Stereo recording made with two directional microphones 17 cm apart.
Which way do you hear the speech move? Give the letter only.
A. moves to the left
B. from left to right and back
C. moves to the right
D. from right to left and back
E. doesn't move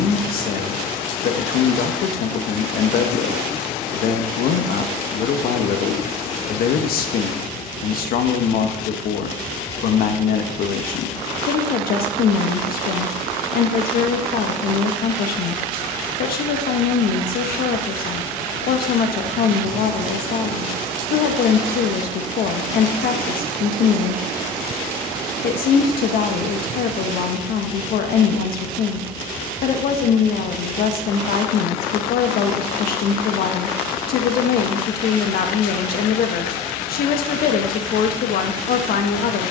E.